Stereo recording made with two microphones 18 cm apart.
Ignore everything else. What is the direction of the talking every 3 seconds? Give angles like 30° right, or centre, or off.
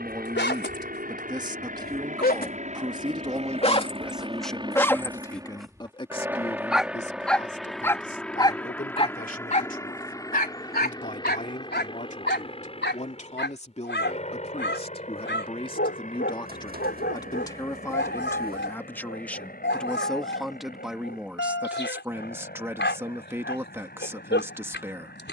20° right, centre, 40° left, 50° left, 40° left, 20° left, 10° left, 10° right, 10° right.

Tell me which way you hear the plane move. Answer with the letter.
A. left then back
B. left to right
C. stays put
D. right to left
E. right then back
D.